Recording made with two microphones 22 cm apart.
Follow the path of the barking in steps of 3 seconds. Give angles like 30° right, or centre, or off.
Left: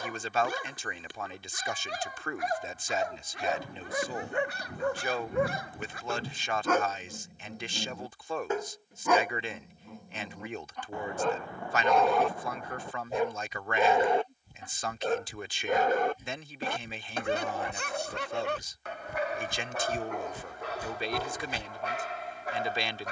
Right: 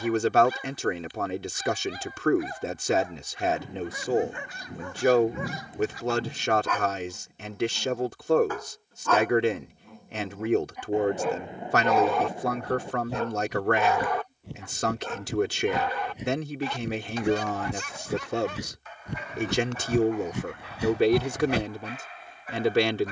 80° left, 70° left, 40° left, centre, 20° left, 50° left, 70° left, 80° left.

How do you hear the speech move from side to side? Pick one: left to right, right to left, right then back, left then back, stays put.
stays put.